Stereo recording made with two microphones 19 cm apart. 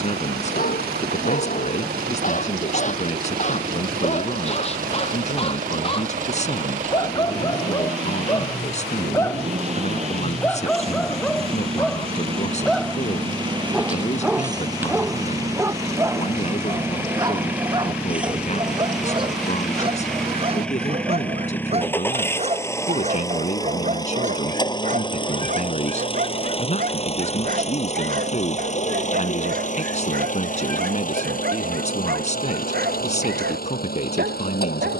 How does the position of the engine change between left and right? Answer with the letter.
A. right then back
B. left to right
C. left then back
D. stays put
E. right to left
E.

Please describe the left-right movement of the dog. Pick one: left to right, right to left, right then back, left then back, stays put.
left to right.